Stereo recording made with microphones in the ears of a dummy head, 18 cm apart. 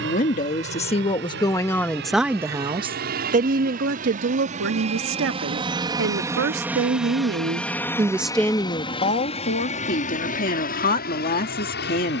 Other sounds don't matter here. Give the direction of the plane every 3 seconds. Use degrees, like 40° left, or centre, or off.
60° right, 40° right, centre, 40° left.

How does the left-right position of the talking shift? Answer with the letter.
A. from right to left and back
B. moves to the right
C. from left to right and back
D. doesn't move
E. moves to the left
C.